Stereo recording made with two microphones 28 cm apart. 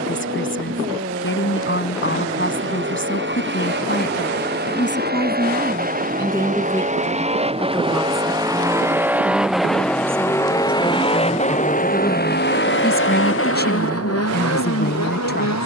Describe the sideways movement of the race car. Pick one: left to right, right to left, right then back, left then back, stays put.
right to left.